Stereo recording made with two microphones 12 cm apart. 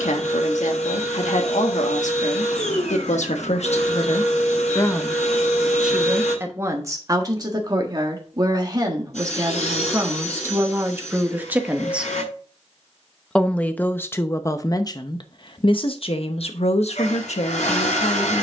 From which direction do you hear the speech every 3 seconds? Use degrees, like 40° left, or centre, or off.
80° left, 40° left, 30° right, 20° right, 20° left, 60° left.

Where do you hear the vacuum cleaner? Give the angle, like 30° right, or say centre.
70° left.